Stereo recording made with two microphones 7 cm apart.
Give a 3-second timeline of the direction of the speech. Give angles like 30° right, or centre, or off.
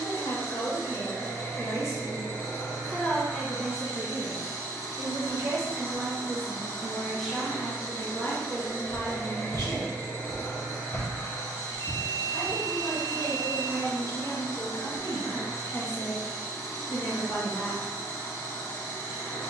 50° left, 20° right, 10° left, 50° left, 50° left, 50° left, off.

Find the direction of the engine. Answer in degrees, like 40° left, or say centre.
40° left.